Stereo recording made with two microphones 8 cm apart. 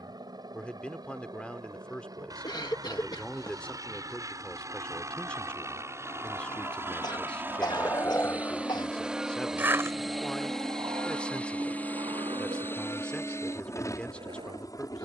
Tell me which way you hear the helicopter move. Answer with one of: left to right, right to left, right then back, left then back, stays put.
right to left.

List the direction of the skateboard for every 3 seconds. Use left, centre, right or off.
off, left, left, right, right.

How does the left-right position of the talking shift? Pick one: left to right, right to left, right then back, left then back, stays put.
stays put.